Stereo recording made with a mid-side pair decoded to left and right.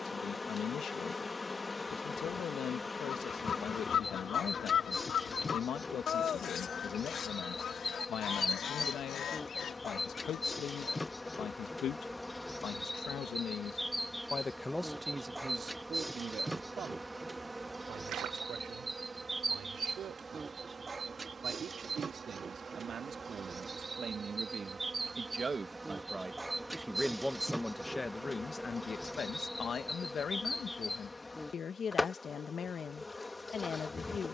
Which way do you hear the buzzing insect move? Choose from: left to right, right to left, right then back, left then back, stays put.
right then back.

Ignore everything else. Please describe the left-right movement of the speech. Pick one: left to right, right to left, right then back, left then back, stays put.
right then back.